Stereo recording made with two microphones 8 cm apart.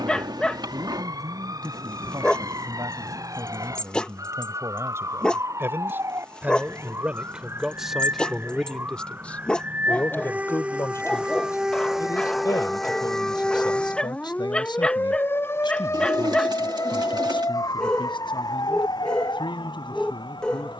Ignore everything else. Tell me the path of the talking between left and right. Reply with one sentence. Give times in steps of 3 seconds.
In this clip you hear the talking on the right from 0 s, in the centre from 6 s and on the left from 9 s.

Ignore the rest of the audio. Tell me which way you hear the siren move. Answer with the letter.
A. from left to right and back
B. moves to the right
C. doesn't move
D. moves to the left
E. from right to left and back
D.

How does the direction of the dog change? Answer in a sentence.
You can hear the dog stay in one place.